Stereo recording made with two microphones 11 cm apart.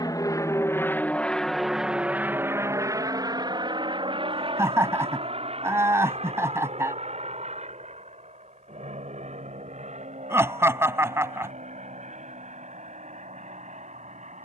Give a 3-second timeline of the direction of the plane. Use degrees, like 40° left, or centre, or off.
centre, 50° right, 60° right, 70° right, 70° right.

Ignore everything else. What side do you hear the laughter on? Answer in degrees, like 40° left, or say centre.
20° right.